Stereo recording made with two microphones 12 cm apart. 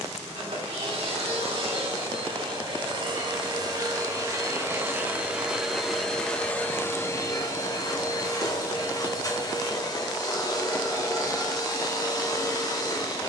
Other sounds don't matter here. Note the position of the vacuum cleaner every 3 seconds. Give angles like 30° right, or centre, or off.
50° right, 20° right, 20° left, 30° left, 30° left.